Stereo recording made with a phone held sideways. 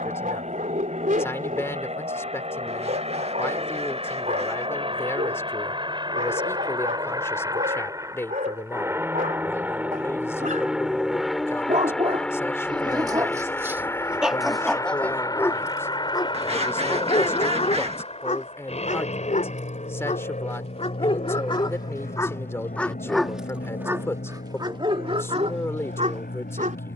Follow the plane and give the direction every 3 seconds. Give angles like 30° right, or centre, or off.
50° right, 40° right, 20° right, 10° right, 10° left, 30° left, 40° left, 50° left, 60° left.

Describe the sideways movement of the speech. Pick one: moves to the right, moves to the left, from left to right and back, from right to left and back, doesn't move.
doesn't move.